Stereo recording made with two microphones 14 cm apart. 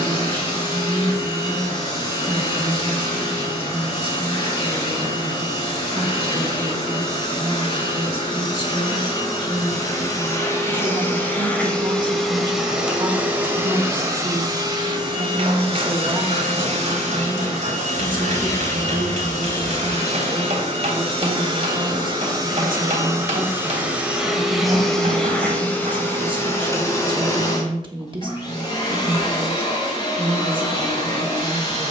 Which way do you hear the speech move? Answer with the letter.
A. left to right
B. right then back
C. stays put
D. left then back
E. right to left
C.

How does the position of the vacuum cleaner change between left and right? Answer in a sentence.
You can hear the vacuum cleaner go right and come back.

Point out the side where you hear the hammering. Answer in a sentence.
You can hear the hammering on the right.